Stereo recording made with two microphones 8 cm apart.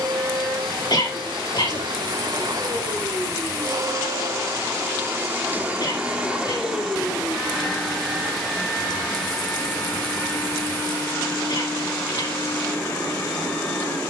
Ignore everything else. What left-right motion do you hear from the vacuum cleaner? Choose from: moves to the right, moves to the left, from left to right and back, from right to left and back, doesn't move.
moves to the left.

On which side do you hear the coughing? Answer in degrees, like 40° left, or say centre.
50° left.